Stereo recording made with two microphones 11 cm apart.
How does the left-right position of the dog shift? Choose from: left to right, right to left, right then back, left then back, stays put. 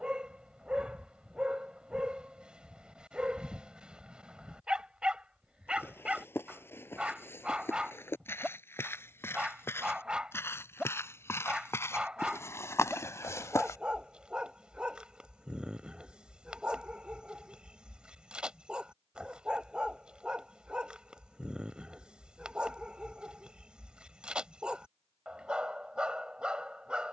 stays put.